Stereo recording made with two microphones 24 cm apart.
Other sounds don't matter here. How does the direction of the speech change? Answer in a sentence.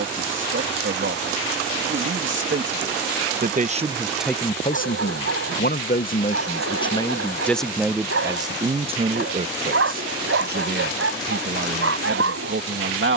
In this clip you hear the speech move from right to left and back again.